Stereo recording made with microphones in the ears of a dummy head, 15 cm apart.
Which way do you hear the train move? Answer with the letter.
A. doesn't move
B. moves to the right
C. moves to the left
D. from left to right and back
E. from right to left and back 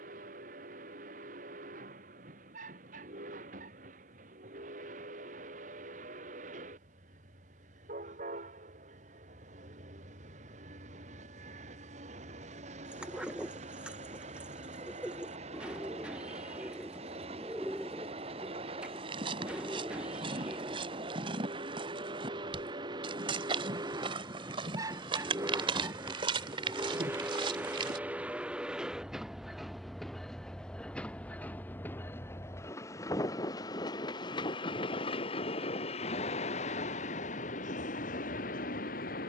C.